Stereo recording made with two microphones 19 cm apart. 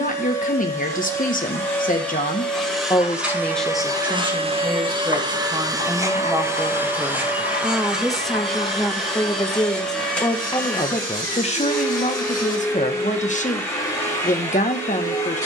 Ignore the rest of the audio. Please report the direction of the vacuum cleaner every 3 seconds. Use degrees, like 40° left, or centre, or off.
10° left, 20° right, 10° right, 10° left, 10° left.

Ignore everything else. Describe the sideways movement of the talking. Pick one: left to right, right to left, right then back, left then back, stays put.
right then back.